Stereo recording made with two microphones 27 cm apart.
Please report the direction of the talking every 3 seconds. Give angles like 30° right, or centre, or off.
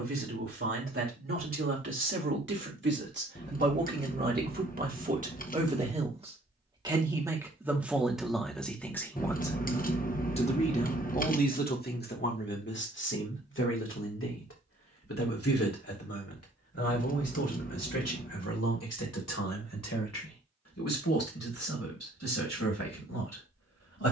50° right, 30° right, 10° right, 20° left, 50° left, 60° left, 70° left, 70° left.